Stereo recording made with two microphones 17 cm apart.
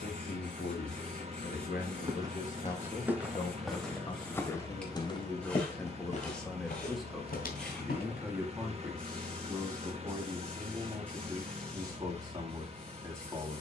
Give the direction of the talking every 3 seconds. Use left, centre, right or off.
left, left, centre, right, right.